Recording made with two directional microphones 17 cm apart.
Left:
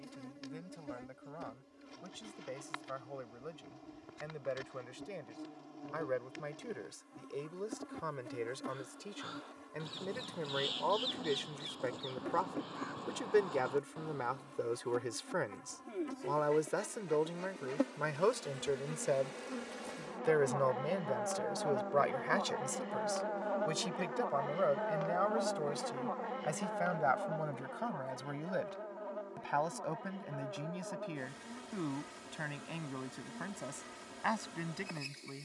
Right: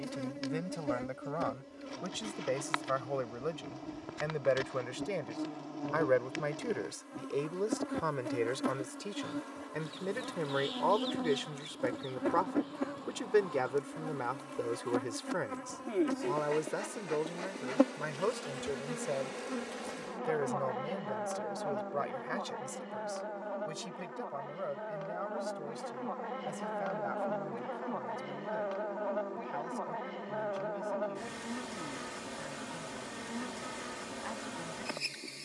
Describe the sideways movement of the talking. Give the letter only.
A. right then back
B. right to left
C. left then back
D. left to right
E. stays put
B.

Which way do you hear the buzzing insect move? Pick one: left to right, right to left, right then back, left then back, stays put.
left then back.